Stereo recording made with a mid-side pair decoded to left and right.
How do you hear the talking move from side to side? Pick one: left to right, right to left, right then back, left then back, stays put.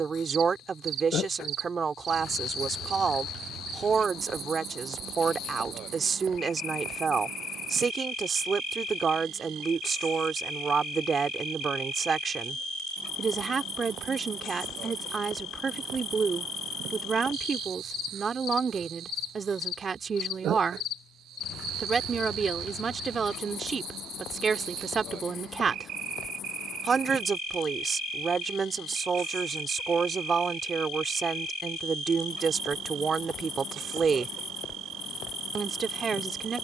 stays put.